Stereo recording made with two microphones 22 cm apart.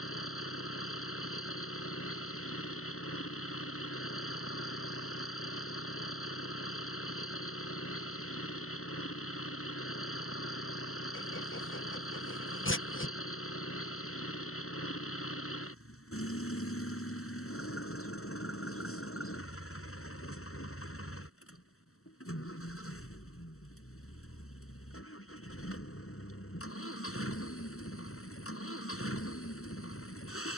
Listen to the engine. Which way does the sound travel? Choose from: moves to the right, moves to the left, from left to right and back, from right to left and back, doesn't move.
doesn't move.